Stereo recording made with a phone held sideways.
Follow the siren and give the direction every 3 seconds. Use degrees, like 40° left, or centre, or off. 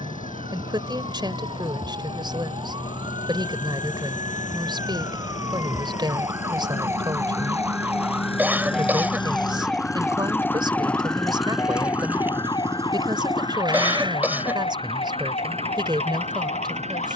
40° right, 30° right, 10° right, 10° left, 40° left, 50° left.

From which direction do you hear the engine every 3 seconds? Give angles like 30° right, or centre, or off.
80° left, 70° left, 50° left, 10° left, 30° right, 50° right.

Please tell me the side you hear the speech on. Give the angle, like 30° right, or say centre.
30° right.